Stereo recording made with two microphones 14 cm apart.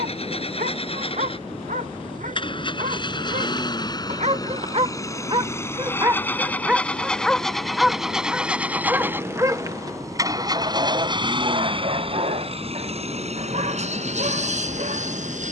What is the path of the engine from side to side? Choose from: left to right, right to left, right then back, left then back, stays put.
left to right.